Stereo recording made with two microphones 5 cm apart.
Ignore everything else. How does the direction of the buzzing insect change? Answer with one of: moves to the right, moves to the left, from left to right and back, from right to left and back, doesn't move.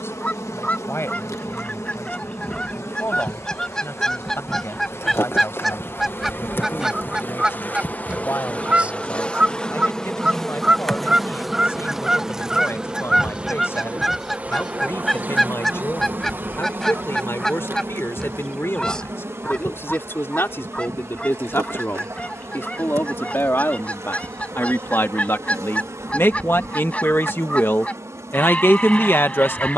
moves to the right.